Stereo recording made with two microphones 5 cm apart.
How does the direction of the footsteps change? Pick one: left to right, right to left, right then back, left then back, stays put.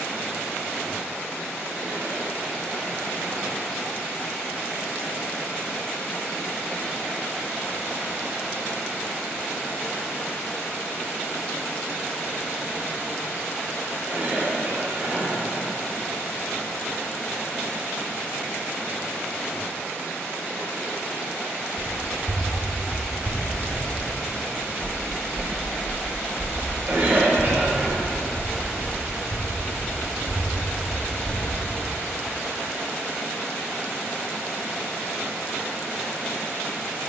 right to left.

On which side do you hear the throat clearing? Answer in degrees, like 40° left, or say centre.
40° right.